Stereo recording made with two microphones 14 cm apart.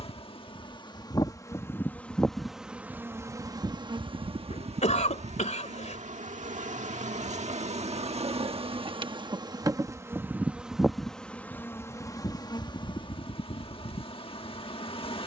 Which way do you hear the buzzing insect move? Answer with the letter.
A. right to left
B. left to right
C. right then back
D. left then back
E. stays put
C.